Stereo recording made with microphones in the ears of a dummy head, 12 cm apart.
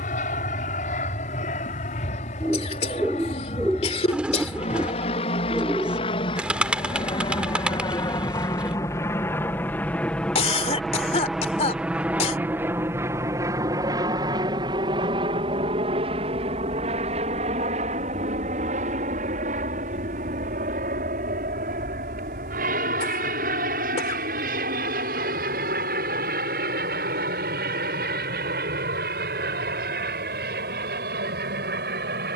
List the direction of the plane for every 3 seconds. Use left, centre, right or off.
left, left, left, centre, right, right, right, right, right, right, right.